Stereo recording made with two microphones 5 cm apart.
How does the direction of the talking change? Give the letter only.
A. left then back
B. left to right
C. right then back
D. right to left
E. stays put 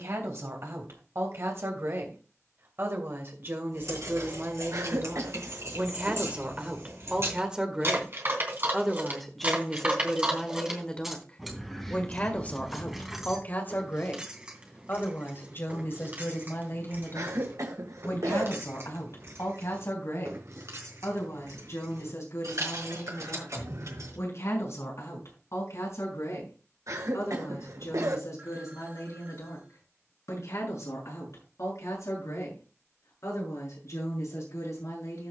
D.